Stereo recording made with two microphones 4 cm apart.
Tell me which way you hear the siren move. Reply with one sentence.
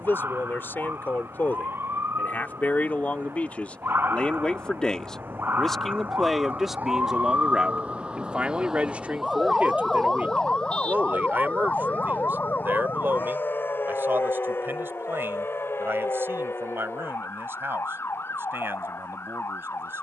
You can hear the siren go from the right side to the left.